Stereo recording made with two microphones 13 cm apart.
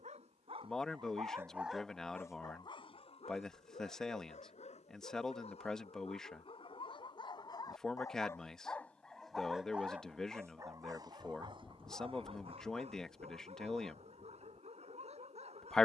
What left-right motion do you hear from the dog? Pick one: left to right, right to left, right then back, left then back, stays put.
left then back.